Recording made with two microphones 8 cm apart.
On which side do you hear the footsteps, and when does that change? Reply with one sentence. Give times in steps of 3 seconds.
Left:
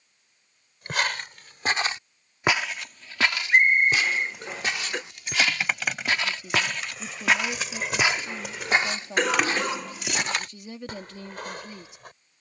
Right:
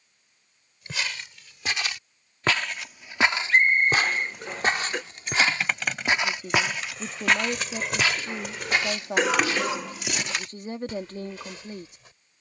You can hear the footsteps on the left from 0 s, on the right from 3 s, in the centre from 6 s and on the left from 9 s.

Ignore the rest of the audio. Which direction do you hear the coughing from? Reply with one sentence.
In this clip you hear the coughing in the centre.